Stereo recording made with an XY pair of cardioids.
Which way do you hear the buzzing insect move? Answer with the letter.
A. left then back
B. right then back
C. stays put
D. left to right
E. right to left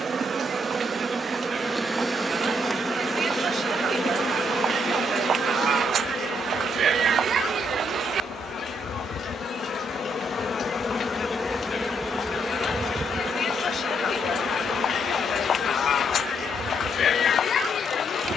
A.